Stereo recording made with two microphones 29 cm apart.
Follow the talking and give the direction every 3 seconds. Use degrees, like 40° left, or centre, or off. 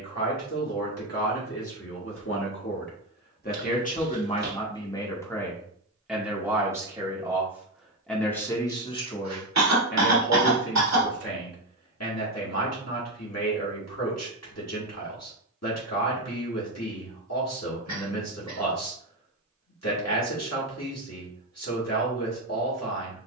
50° left, 20° left, centre, 40° left, 60° left, 60° left, 60° left, 60° left.